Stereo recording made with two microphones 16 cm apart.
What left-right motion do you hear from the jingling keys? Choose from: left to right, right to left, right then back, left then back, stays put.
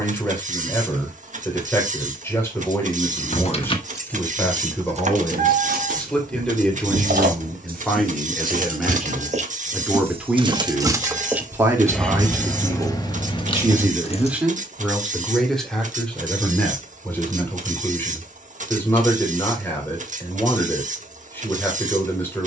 right then back.